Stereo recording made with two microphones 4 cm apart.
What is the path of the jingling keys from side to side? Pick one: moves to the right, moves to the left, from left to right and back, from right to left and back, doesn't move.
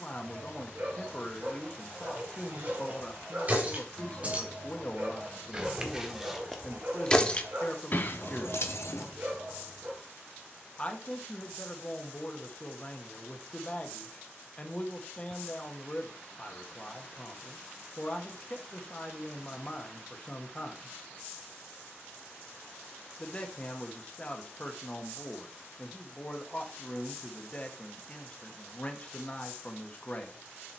moves to the left.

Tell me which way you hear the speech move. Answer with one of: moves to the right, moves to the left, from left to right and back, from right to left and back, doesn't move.
doesn't move.